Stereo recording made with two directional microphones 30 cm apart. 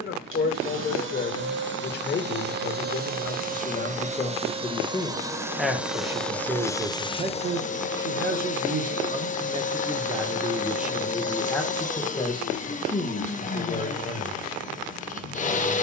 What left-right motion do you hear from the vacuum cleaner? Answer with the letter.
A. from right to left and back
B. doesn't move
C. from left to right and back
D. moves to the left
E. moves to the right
D.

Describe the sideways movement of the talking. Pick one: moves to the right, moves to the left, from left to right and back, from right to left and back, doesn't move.
from left to right and back.